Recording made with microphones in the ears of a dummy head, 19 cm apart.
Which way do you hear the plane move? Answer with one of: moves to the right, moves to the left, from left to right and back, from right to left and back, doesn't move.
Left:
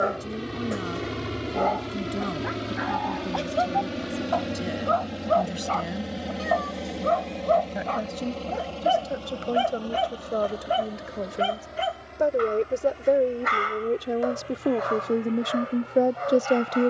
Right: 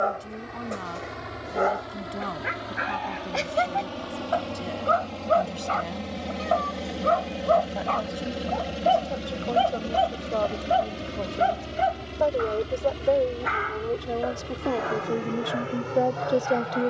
moves to the right.